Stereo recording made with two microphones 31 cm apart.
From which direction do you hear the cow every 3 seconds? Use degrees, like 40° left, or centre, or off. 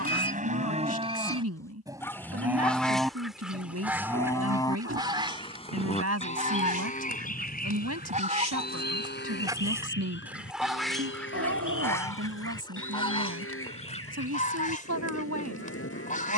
20° right, 10° left, 30° left, 40° left, 50° left, 50° left.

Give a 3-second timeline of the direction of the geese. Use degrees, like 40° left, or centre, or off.
10° left, 10° right, 30° right, centre, 20° left, 30° left.